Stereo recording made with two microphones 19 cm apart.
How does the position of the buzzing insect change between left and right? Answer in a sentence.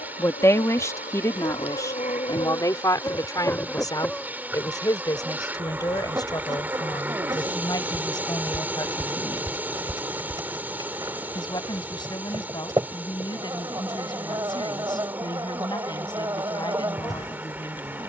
In this clip you hear the buzzing insect travel towards the right.